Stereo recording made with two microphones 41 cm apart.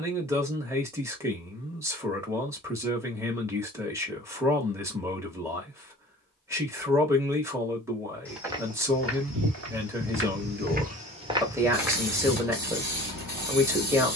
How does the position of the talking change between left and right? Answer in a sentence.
In this clip you hear the talking stay in one place.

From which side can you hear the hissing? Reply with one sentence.
You can hear the hissing on the right.